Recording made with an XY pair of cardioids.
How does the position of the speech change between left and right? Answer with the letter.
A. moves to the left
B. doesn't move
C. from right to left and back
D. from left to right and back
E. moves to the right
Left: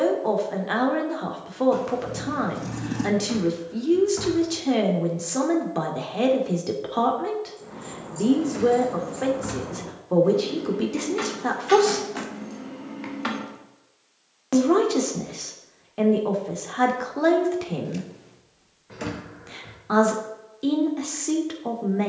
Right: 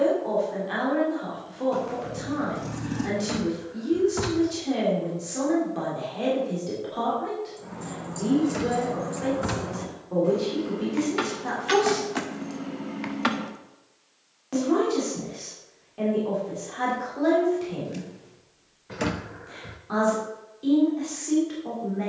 B.